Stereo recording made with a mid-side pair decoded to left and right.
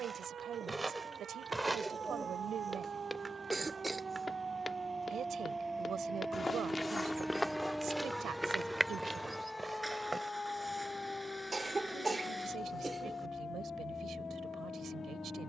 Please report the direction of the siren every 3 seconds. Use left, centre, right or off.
right, right, centre, left, left.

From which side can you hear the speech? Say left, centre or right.
right.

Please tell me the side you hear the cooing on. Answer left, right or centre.
centre.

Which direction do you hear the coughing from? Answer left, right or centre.
right.